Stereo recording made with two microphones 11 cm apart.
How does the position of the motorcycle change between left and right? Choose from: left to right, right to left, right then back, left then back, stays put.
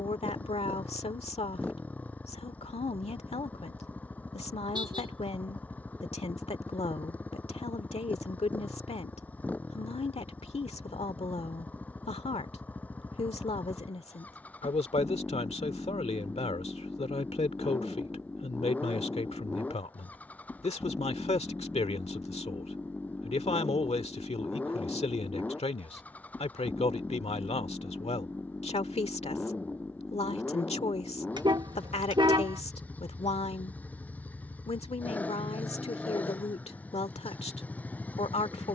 stays put.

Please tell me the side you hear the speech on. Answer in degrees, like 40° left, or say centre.
70° left.